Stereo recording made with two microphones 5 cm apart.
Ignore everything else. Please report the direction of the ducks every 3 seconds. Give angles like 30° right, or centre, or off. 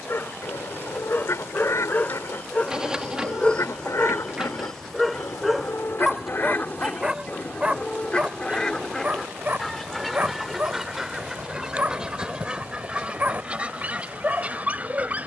70° left, 60° left, 30° left, centre, 20° right.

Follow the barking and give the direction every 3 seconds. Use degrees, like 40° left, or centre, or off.
40° left, 10° left, 20° right, 30° right, 30° right.